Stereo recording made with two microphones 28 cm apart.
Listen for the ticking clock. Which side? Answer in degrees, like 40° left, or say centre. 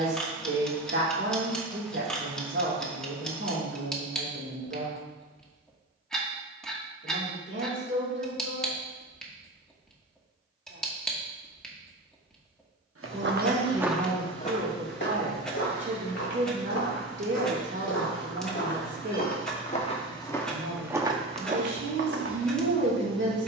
centre.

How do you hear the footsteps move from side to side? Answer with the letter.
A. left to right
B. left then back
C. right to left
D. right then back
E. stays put
B.